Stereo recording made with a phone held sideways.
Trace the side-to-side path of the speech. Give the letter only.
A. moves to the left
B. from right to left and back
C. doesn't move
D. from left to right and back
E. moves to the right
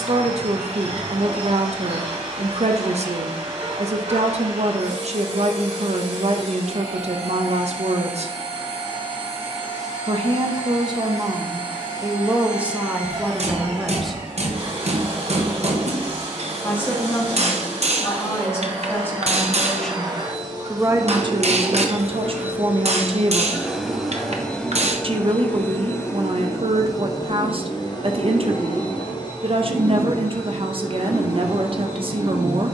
B.